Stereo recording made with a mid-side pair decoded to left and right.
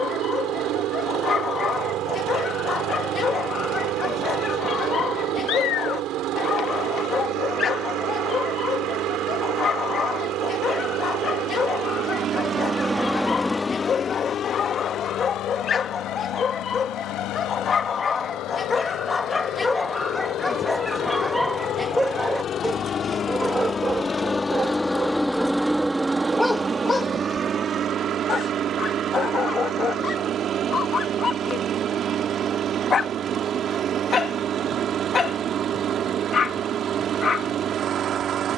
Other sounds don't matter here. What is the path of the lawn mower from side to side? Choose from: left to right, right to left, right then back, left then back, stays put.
left then back.